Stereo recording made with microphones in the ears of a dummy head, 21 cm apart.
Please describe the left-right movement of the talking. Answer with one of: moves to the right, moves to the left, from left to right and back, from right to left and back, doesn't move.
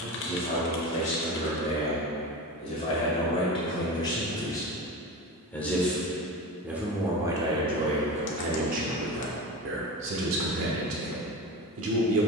moves to the right.